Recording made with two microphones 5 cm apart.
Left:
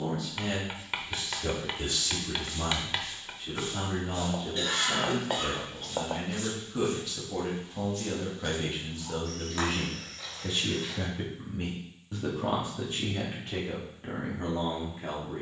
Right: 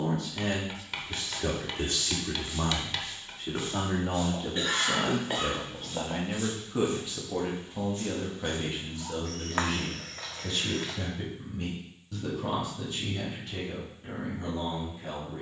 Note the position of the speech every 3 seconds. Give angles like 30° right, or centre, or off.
50° right, 40° right, 10° right, 10° left, 40° left.